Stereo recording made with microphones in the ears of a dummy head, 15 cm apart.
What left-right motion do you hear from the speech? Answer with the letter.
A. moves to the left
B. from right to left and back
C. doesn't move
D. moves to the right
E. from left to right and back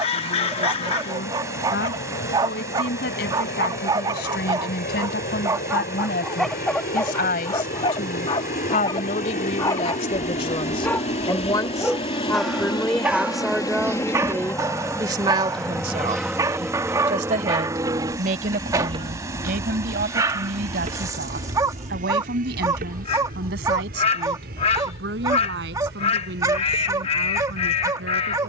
D.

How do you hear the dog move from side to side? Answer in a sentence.
In this clip you hear the dog go left and come back.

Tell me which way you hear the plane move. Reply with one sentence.
In this clip you hear the plane move from left to right.